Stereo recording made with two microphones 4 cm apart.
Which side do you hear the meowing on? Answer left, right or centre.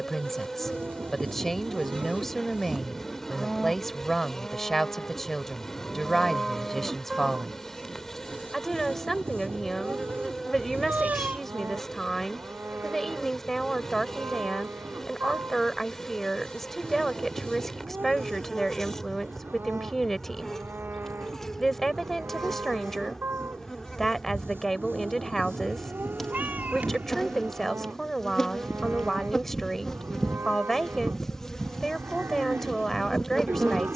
right.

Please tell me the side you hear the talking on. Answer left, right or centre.
centre.